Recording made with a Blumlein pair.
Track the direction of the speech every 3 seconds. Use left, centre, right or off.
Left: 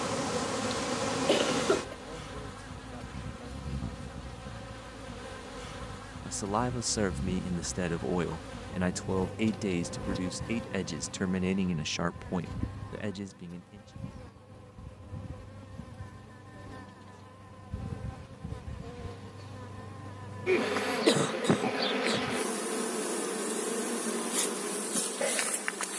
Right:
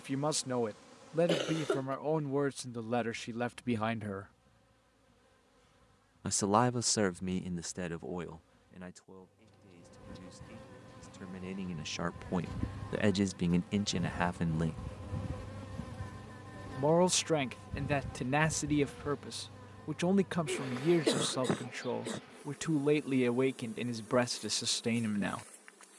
right, right, centre, left, right, right, right, right, right.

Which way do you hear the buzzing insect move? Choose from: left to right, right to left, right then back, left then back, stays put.
right then back.